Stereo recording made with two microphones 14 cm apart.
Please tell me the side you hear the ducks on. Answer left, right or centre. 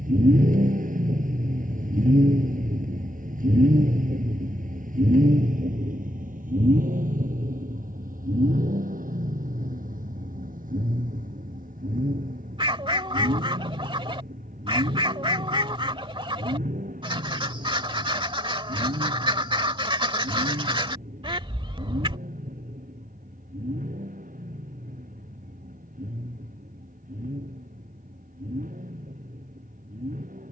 right.